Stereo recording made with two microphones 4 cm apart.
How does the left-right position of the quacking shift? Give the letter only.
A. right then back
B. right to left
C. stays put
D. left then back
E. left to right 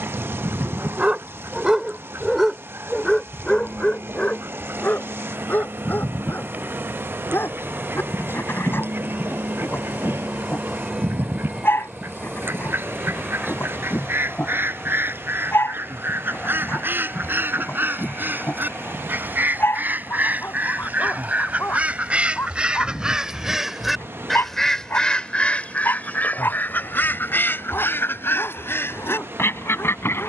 B.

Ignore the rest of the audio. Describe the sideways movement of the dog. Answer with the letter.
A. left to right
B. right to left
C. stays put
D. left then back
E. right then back
B.